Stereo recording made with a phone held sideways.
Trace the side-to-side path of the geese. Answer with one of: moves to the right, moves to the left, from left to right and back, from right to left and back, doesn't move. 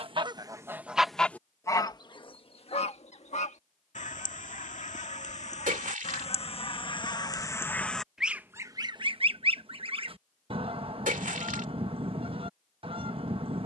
from right to left and back.